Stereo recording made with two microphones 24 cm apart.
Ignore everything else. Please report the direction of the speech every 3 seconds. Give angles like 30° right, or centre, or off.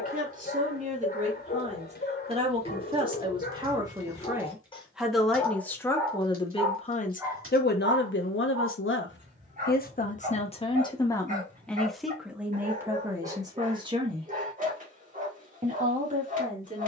30° right, 10° right, 40° left, 20° left, 10° right, 30° right.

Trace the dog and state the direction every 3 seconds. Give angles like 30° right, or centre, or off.
40° left, 30° left, 10° right, 30° right, 30° right, 30° right.